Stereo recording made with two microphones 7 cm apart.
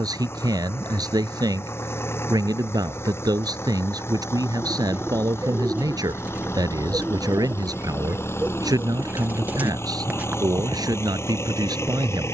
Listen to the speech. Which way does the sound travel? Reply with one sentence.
You can hear the speech stay put.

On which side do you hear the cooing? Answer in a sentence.
In this clip you hear the cooing on the right.